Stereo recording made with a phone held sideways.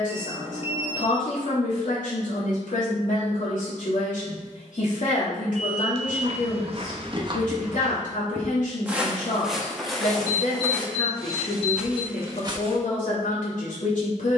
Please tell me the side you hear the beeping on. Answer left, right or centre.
left.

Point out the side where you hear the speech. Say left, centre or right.
left.